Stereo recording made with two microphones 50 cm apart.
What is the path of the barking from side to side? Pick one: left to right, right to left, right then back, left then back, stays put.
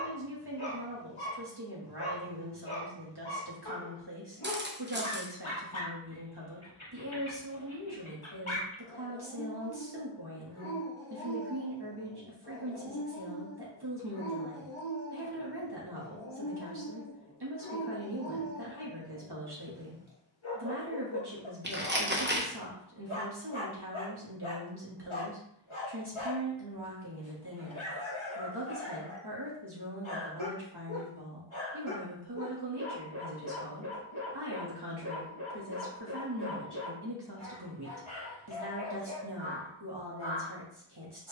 stays put.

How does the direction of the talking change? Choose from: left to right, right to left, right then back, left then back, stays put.
stays put.